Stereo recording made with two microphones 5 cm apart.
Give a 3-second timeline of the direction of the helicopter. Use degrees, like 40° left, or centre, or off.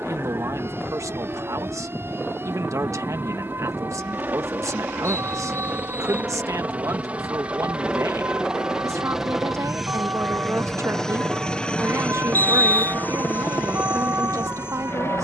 40° right, 40° right, 20° right, centre, 40° left.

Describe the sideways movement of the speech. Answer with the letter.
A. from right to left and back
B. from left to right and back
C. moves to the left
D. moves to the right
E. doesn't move
E.